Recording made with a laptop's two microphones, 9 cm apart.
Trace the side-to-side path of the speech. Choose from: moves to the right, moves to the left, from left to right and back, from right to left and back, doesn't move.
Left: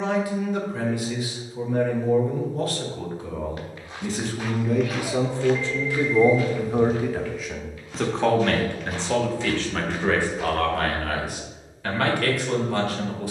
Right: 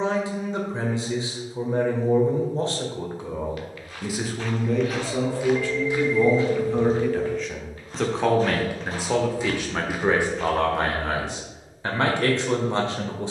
from right to left and back.